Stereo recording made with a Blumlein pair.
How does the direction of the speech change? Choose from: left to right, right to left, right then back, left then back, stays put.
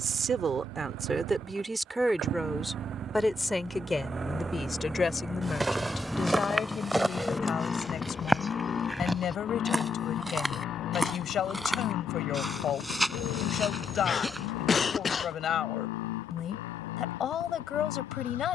right to left.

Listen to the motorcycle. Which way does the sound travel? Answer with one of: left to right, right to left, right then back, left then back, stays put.
right to left.